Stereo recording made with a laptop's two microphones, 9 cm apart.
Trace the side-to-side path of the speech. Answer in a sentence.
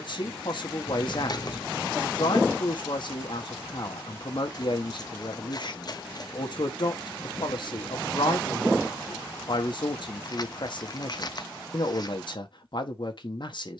You can hear the speech stay in one place.